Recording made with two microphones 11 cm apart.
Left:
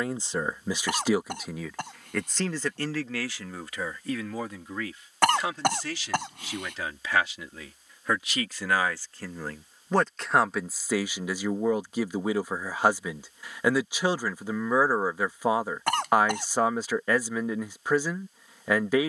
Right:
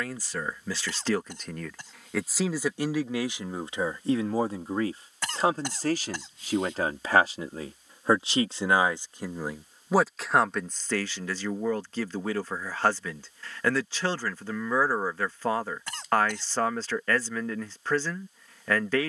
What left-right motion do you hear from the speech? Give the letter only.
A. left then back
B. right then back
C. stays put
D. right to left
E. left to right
B.